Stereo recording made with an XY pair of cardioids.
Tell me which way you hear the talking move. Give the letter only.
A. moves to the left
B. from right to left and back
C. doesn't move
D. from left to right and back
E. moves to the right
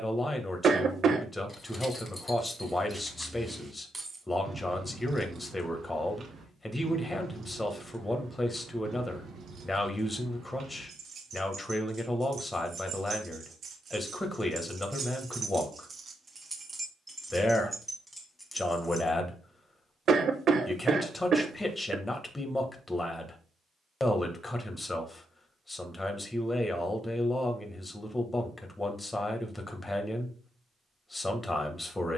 C.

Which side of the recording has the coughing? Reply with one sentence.
In this clip you hear the coughing on the right.